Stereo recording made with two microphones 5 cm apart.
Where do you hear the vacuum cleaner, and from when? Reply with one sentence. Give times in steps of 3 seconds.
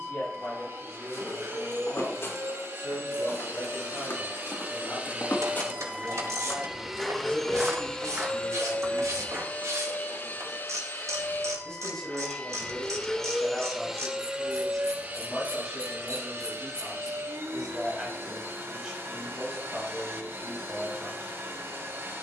In this clip you hear the vacuum cleaner on the right from 0 s, in the centre from 6 s, on the left from 9 s, in the centre from 12 s and on the right from 15 s.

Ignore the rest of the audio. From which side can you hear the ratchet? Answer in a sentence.
In this clip you hear the ratchet on the right.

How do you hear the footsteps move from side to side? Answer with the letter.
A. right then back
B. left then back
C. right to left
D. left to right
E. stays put
D.